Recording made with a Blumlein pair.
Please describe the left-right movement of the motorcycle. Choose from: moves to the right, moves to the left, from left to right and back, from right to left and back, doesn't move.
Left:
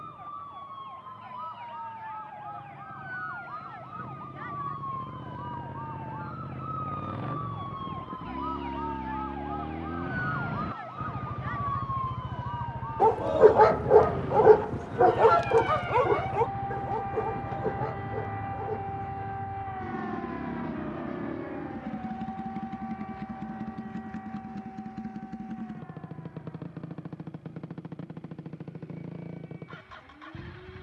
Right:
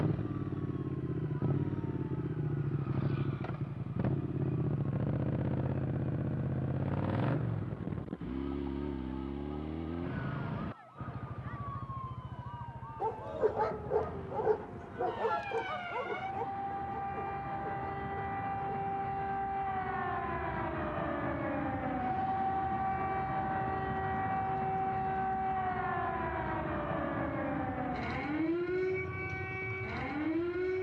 moves to the left.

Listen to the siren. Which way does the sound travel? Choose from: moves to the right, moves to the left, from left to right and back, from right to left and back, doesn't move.
moves to the right.